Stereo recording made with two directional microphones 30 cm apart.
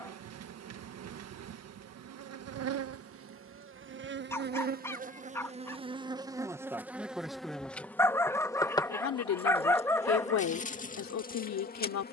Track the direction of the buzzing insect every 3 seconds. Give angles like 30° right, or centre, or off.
60° right, 30° right, centre, 20° left.